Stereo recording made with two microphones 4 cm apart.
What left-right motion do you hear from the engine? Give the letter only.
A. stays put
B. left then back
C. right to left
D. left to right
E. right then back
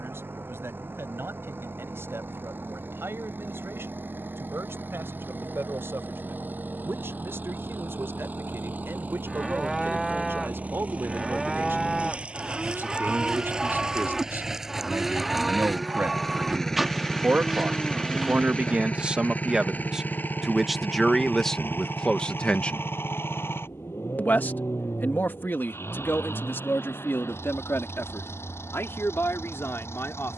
C.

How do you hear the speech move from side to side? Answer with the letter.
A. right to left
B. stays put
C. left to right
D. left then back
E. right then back
A.